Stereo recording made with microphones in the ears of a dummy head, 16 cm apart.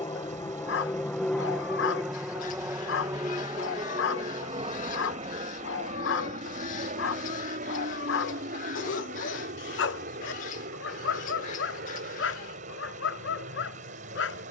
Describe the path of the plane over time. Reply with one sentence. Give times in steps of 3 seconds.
In this clip you hear the plane in the centre from 0 s and on the right from 3 s.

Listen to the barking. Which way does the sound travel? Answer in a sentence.
You can hear the barking stay in one place.